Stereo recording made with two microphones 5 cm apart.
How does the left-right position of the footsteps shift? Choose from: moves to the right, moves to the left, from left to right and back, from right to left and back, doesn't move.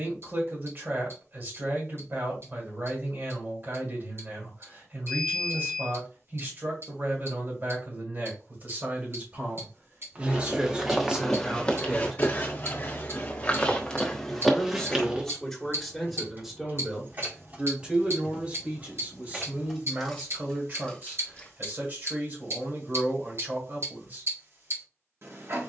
from right to left and back.